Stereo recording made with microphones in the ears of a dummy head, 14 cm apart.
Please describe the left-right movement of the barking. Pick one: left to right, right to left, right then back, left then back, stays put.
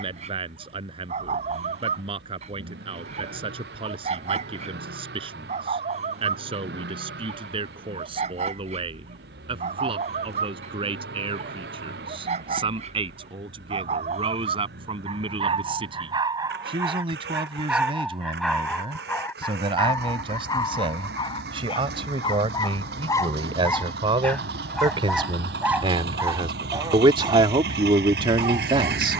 left then back.